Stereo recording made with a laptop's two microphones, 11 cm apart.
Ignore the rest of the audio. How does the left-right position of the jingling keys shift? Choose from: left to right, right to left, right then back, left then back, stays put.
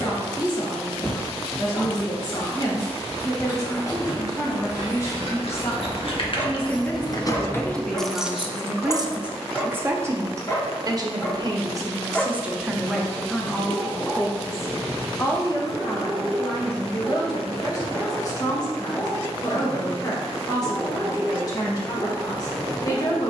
left to right.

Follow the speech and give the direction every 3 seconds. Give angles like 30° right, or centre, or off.
40° left, 30° left, 10° left, 30° right, centre, 30° left, 40° left, 40° left.